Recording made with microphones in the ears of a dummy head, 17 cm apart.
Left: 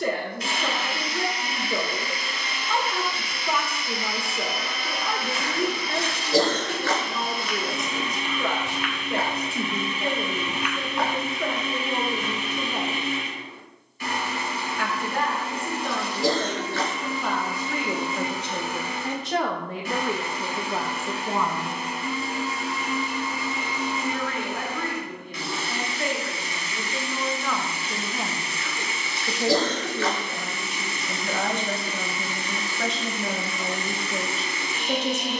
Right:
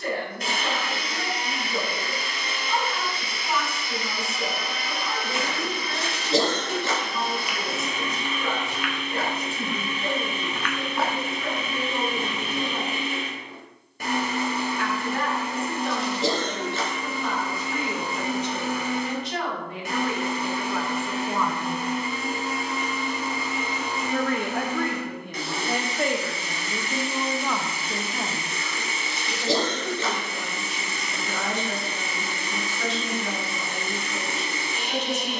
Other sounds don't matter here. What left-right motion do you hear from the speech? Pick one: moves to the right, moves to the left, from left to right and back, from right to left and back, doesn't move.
from left to right and back.